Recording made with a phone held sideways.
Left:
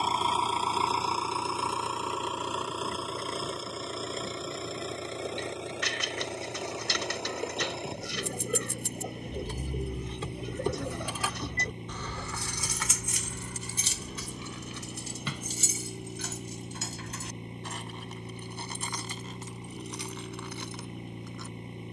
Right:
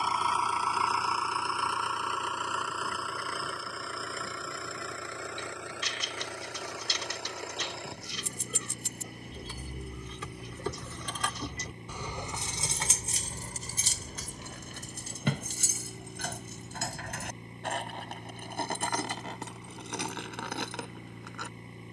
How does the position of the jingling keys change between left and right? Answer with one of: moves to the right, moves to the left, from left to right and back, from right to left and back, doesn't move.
moves to the right.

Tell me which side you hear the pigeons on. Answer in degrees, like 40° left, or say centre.
70° left.